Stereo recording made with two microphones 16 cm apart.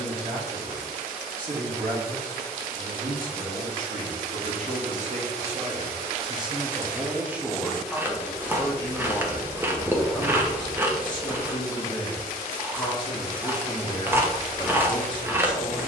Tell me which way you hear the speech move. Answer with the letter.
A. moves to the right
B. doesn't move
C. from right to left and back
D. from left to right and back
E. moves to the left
E.